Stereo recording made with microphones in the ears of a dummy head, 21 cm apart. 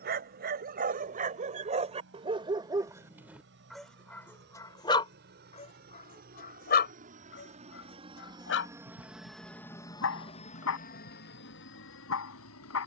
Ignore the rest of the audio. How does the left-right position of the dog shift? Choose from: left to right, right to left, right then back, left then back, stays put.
right to left.